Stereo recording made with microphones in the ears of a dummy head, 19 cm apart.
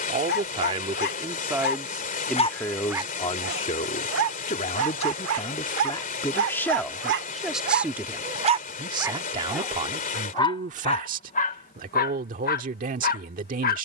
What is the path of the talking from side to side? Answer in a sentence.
In this clip you hear the talking move from right to left and back again.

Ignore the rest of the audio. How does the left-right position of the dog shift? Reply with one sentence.
You can hear the dog move from left to right and back again.